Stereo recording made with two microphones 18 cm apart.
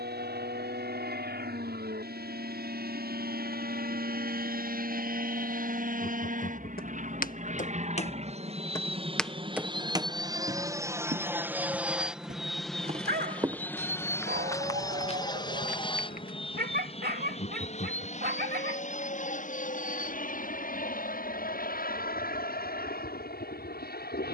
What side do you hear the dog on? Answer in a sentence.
In this clip you hear the dog on the right.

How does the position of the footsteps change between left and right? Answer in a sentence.
You can hear the footsteps go right and come back.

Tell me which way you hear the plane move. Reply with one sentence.
In this clip you hear the plane move from right to left.